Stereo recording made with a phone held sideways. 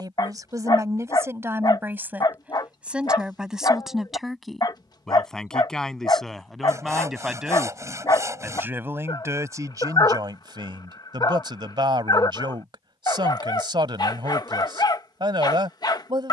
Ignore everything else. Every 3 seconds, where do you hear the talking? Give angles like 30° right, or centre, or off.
20° right, centre, 10° right, 30° right, 30° right, 30° right.